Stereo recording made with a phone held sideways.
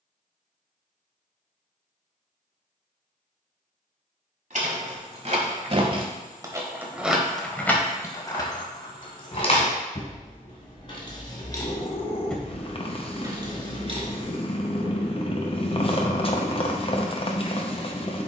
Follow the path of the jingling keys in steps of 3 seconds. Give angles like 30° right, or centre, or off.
off, 50° right, 10° left, 40° left, 30° right, off.